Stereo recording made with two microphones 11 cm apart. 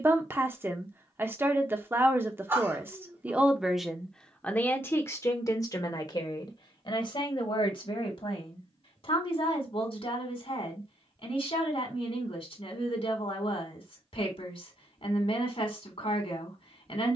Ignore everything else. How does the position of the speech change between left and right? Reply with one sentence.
You can hear the speech move to the left.